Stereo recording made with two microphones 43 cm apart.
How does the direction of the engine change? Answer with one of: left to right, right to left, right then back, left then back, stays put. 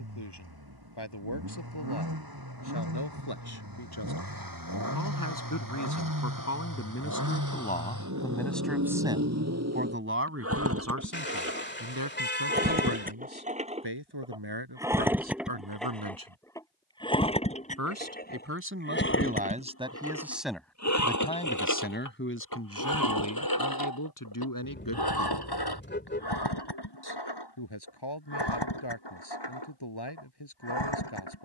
right to left.